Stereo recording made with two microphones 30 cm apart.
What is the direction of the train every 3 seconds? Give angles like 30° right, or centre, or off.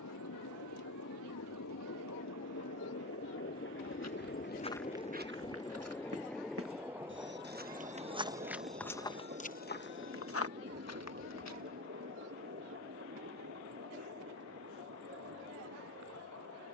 70° left, 30° left, 10° right, 40° right, 50° right, 50° right.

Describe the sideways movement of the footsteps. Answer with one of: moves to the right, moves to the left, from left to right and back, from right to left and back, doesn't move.
from left to right and back.